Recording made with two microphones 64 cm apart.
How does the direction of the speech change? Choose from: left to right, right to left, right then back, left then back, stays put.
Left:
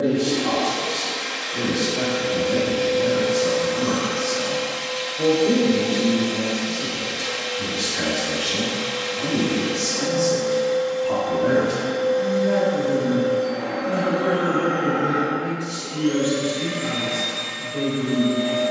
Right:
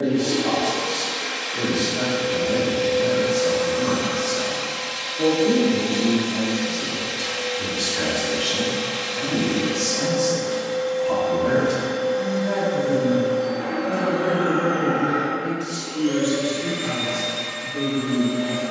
right then back.